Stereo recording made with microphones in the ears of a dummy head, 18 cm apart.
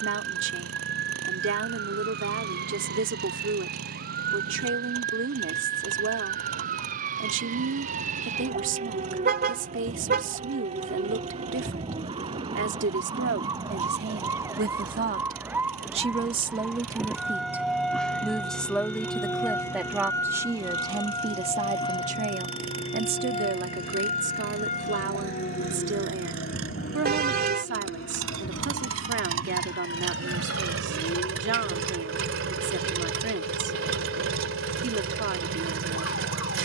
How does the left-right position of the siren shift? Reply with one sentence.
In this clip you hear the siren travel towards the left.